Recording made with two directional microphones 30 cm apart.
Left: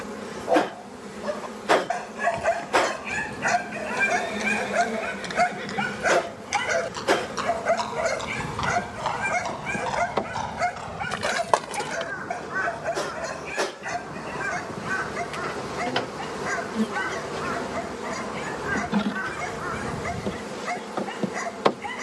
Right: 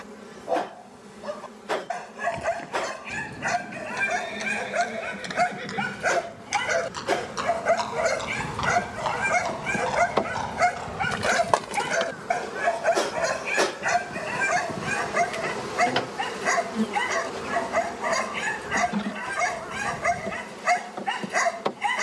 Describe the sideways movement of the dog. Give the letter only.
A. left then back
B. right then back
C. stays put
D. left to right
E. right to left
D.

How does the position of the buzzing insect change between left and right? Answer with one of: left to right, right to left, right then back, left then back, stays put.
right then back.